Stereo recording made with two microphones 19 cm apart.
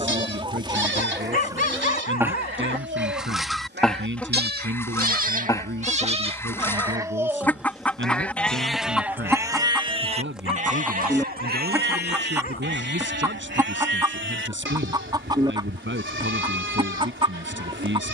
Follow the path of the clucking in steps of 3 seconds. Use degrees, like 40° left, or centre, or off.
20° right, 10° left, 10° left, centre, 20° right, 20° right.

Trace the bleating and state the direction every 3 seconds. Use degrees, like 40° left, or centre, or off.
70° right, 50° right, 10° right, 40° right, 70° right, 80° right.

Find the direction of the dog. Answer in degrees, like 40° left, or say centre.
50° left.